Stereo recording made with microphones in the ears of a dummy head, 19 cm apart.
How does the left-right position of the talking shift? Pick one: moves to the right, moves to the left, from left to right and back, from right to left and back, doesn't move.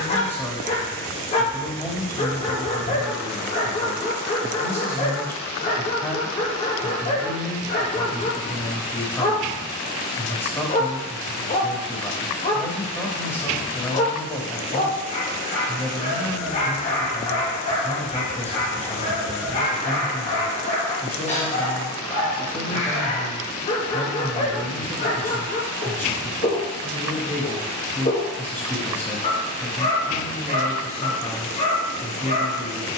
doesn't move.